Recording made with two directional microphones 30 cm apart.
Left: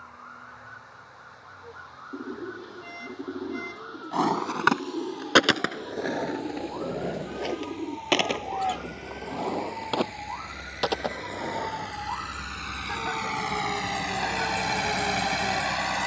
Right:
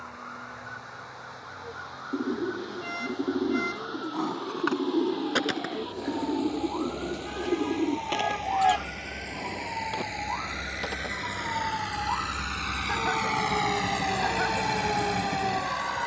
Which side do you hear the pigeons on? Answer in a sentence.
In this clip you hear the pigeons on the right.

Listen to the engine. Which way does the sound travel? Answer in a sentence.
In this clip you hear the engine go from the right side to the left.